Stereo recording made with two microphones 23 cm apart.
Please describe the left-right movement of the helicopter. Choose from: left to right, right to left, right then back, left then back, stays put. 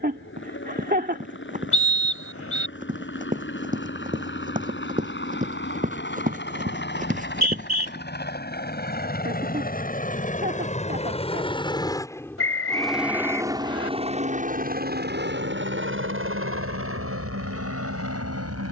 left to right.